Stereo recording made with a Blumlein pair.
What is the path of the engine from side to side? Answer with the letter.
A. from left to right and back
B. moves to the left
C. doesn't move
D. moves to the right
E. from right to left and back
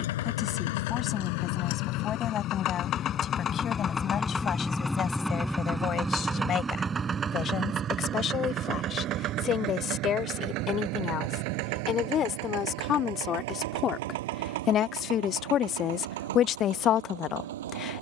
D.